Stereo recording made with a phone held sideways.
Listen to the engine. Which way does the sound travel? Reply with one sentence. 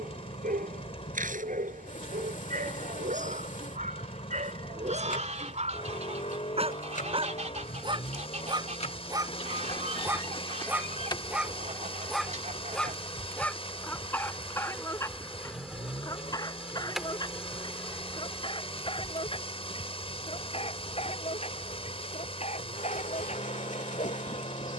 In this clip you hear the engine stay put.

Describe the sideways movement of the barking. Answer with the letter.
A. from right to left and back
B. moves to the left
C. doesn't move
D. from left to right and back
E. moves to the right
B.